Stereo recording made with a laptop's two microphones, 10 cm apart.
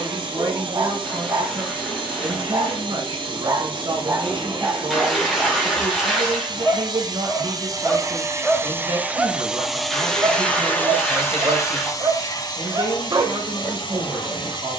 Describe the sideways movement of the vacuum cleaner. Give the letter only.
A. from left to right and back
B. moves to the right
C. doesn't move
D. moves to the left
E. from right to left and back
D.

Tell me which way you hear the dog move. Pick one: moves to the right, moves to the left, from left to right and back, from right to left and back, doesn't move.
from right to left and back.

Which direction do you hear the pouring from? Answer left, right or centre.
centre.